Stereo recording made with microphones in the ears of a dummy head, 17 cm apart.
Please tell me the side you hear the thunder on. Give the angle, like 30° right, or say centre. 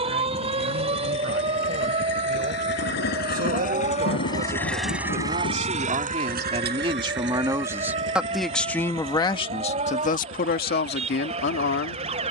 70° left.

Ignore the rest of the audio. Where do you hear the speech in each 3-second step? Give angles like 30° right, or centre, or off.
60° right, 50° right, 20° right, 50° left.